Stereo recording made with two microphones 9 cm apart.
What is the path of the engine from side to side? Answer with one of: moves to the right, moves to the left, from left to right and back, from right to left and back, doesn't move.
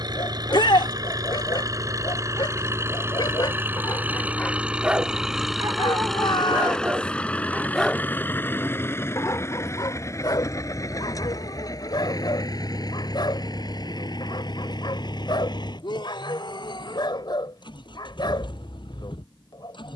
moves to the left.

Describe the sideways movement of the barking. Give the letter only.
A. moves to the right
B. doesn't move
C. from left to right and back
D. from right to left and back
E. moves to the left
C.